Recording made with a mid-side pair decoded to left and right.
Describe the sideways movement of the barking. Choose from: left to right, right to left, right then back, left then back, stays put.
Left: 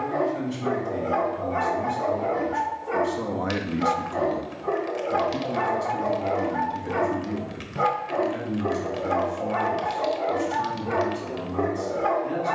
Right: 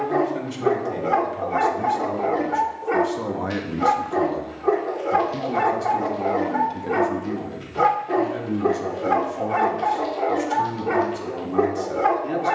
stays put.